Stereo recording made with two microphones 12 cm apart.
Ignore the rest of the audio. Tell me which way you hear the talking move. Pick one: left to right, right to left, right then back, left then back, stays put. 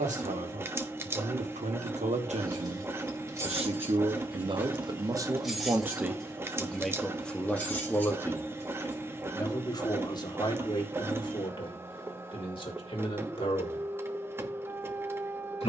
right to left.